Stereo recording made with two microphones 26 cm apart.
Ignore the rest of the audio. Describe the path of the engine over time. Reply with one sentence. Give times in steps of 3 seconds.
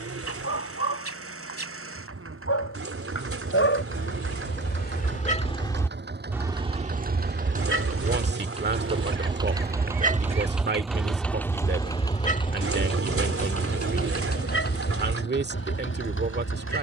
In this clip you hear the engine on the right from 0 s, in the centre from 9 s and on the left from 12 s.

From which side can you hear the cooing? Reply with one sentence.
You can hear the cooing on the right.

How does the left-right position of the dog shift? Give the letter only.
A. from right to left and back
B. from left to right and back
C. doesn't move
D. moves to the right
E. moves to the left
B.